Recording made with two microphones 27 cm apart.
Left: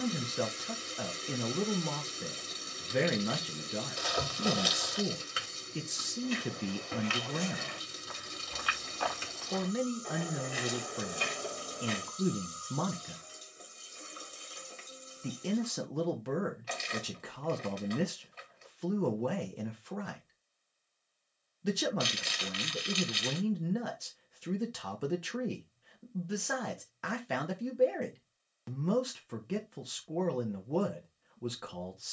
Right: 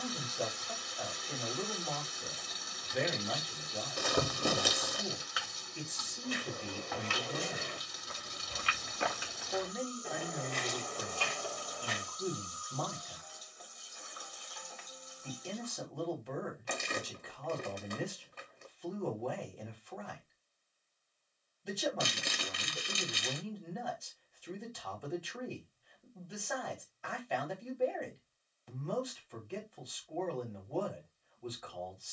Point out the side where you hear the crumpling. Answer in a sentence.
In this clip you hear the crumpling on the right.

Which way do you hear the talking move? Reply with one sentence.
In this clip you hear the talking stay in one place.